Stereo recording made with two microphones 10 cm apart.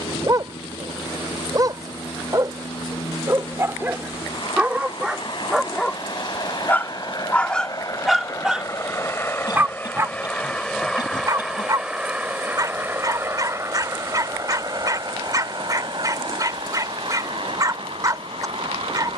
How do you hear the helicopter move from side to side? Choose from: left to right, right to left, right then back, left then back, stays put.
left to right.